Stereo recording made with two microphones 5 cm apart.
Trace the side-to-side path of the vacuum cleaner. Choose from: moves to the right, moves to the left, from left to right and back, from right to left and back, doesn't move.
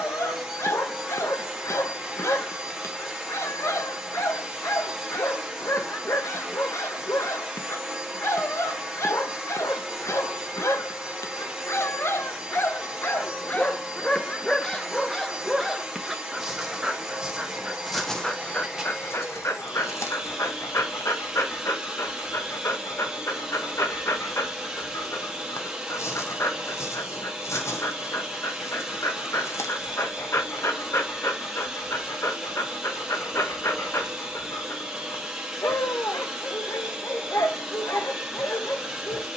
doesn't move.